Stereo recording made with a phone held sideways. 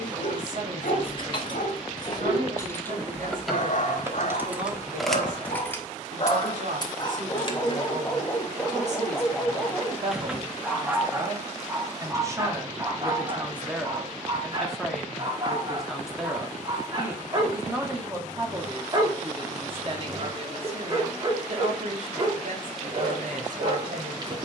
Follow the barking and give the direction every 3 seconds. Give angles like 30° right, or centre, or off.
60° left, 60° left, 20° left, 10° right, 30° right, 30° right, 30° right, 30° right.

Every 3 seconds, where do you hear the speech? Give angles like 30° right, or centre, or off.
70° right, 70° right, 60° right, 40° right, 10° right, 10° right, 30° right, 60° right.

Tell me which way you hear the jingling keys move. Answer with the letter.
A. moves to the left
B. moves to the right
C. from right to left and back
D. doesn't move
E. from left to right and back
E.